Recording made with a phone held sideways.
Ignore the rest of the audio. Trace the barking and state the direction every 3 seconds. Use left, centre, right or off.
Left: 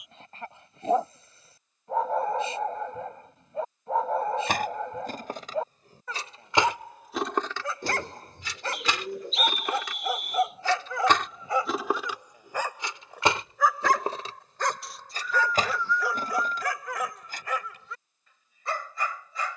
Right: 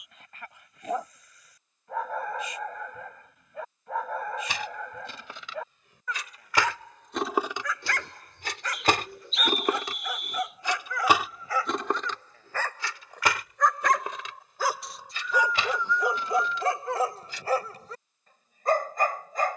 left, left, left, left, centre, right, right.